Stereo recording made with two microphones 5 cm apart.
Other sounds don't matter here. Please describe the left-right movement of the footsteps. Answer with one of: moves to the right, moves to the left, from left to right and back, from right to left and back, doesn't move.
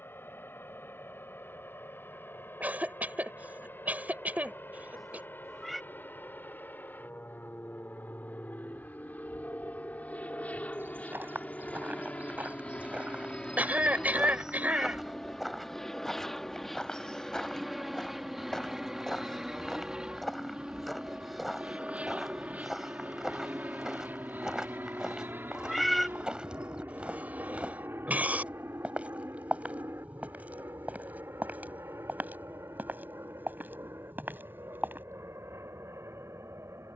from right to left and back.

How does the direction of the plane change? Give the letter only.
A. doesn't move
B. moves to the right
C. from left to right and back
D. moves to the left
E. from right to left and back
B.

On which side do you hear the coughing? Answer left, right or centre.
right.